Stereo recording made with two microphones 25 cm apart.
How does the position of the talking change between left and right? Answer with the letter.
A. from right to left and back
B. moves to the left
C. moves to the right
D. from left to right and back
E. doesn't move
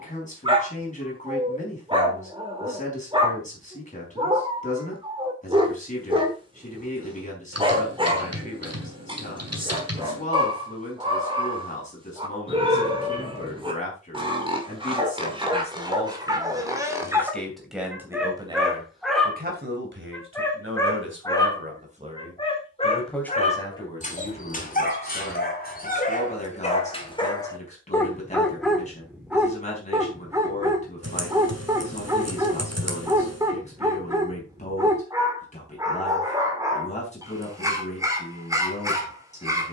D.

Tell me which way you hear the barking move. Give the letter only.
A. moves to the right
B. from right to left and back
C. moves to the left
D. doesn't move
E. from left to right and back
B.